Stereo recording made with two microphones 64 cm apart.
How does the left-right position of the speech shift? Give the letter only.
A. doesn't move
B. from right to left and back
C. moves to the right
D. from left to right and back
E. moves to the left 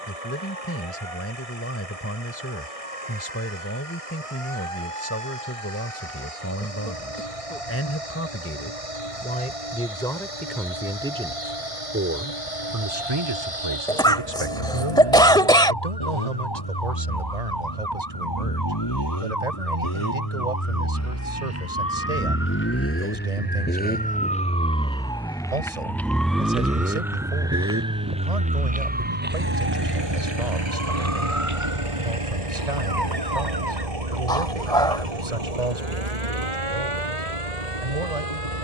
C.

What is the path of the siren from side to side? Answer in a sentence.
In this clip you hear the siren move to the right.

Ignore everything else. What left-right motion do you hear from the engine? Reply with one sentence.
In this clip you hear the engine travel towards the right.